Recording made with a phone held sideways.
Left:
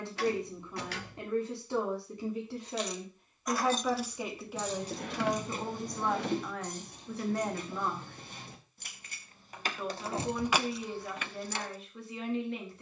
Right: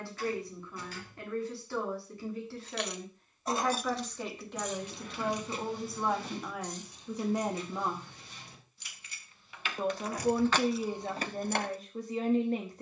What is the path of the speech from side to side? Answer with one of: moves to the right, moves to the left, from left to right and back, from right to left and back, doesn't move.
moves to the right.